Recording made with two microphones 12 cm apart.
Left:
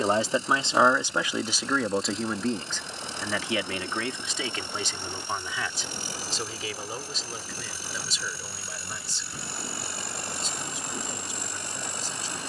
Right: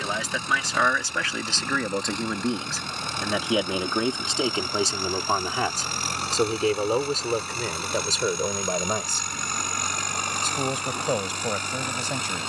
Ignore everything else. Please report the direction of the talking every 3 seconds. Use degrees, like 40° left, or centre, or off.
10° left, 30° right, 60° right, 70° right.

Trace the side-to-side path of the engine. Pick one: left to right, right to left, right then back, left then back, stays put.
stays put.